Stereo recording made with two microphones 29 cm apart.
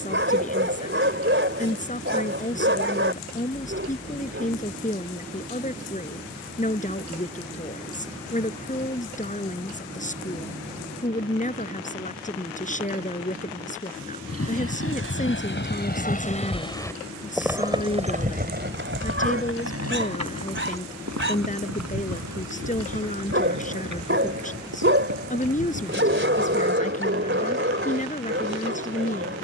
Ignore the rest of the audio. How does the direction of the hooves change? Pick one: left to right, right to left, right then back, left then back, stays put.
left to right.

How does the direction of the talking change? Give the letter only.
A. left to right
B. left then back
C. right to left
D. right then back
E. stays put
E.